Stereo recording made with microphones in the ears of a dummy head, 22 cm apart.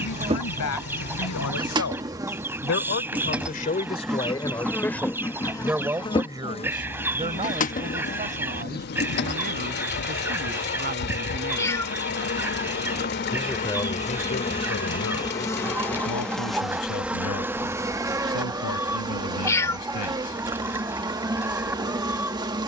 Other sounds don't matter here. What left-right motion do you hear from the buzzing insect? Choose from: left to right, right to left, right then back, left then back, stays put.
left then back.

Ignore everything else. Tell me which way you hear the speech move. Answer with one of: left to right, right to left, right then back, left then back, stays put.
right then back.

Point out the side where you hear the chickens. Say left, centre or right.
centre.